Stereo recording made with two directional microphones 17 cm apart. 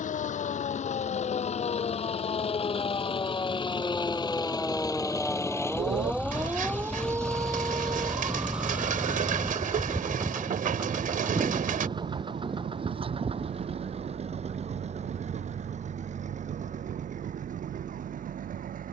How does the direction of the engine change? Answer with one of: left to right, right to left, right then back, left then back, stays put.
left to right.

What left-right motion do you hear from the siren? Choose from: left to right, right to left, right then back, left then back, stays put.
left to right.